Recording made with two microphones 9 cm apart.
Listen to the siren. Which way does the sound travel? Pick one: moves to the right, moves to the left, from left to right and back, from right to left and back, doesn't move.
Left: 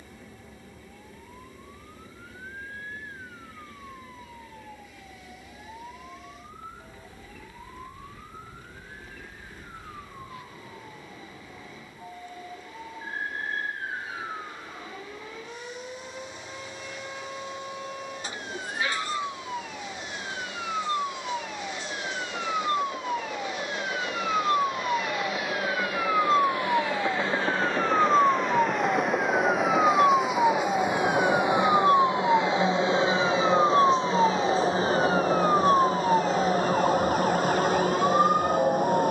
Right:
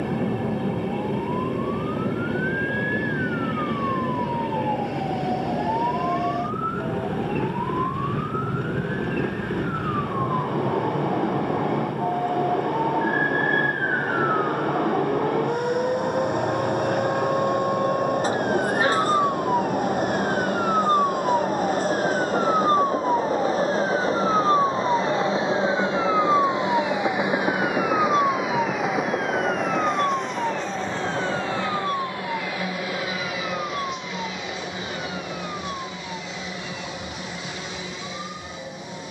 moves to the left.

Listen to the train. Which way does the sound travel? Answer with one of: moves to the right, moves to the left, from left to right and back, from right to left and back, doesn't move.
moves to the left.